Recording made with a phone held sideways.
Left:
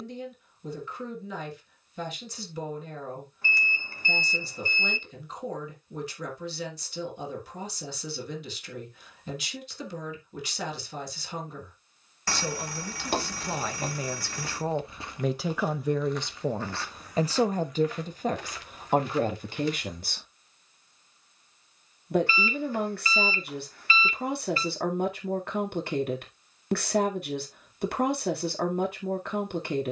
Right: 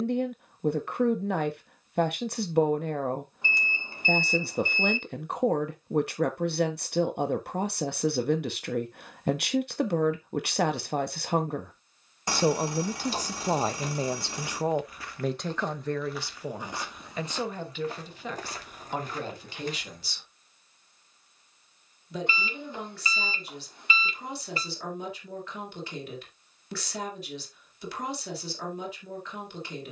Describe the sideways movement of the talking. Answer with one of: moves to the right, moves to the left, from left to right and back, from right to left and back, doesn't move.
moves to the left.